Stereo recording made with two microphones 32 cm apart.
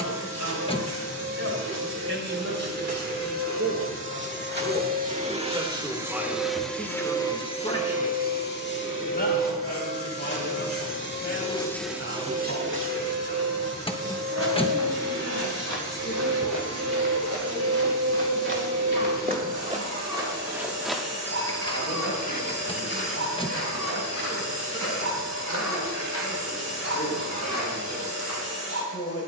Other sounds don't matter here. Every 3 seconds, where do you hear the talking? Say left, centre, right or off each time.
right, right, centre, left, left, left, left, left, left, left.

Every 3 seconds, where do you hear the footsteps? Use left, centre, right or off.
off, off, off, off, right, right, right, left, left, left.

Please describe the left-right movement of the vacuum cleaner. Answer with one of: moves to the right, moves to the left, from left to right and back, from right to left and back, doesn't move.
from right to left and back.